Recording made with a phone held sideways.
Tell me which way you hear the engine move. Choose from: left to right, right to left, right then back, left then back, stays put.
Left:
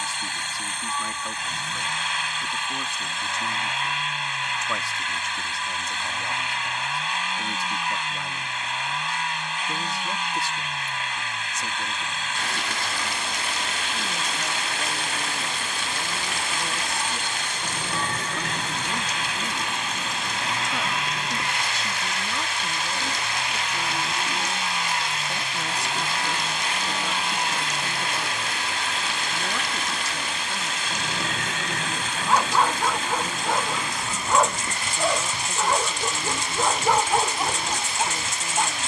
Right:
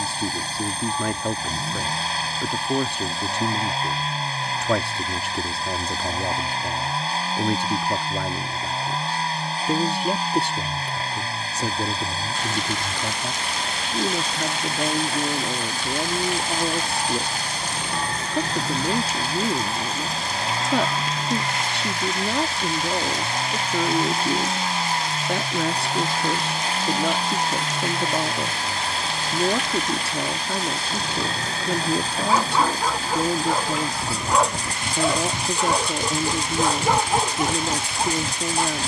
stays put.